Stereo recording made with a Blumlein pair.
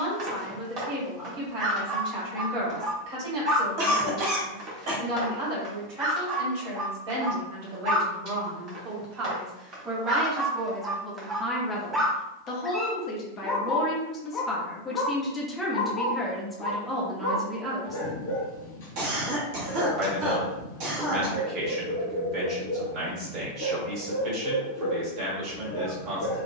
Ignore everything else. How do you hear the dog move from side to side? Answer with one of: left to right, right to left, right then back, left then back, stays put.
right to left.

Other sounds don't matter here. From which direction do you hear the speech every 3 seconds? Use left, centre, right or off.
right, right, right, centre, left, centre, right, right, right.